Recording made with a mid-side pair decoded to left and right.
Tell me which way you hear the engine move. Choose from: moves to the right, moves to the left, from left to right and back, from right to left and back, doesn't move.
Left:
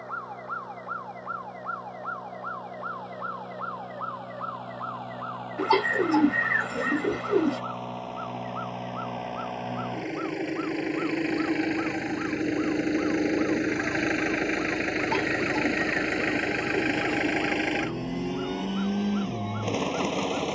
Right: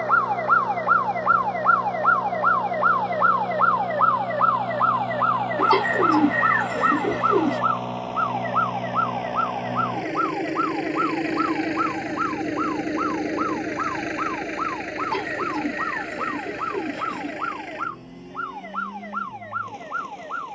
moves to the left.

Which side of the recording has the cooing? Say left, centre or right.
centre.